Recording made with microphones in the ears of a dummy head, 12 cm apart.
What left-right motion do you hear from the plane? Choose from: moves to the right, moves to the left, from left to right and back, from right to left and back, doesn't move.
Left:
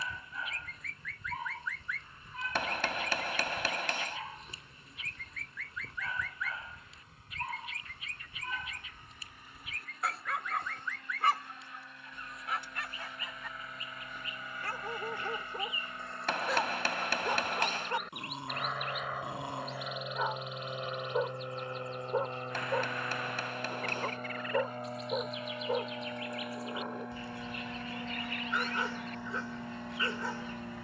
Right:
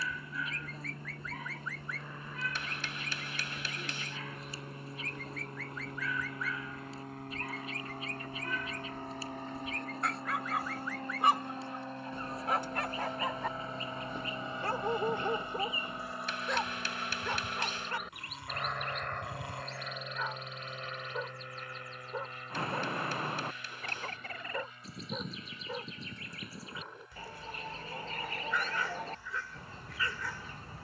moves to the left.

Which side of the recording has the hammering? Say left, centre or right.
left.